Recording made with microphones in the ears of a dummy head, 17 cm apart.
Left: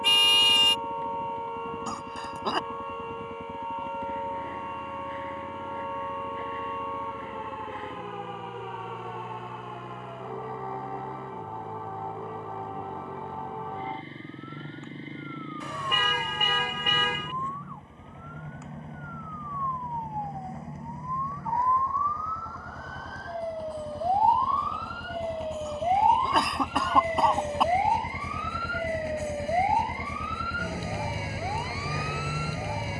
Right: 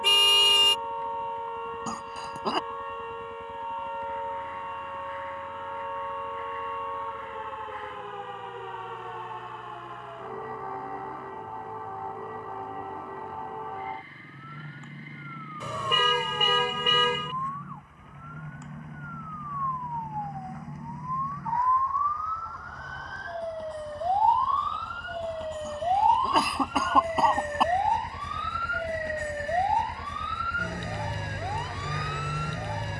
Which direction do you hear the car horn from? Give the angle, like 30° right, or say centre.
80° right.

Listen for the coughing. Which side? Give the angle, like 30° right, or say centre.
centre.